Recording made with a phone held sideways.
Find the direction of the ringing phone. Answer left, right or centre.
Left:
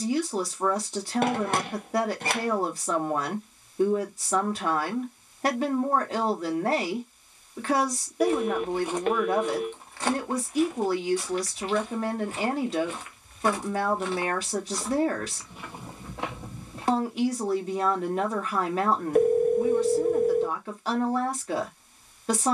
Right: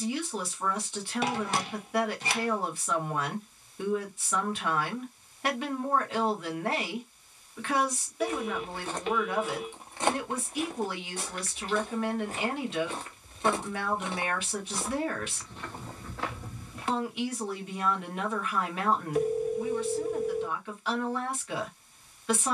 left.